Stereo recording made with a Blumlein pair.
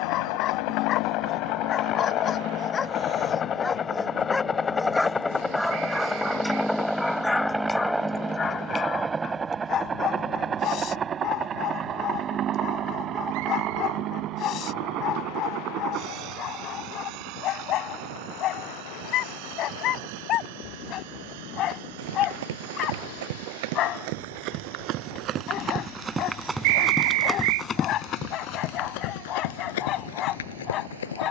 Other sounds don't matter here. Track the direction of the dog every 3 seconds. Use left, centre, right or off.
left, centre, centre, left, left, left, left, left, left, left, left.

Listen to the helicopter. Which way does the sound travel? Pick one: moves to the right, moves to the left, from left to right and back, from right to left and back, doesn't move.
moves to the right.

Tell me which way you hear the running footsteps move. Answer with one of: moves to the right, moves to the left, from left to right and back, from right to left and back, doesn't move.
moves to the left.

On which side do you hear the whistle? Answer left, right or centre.
right.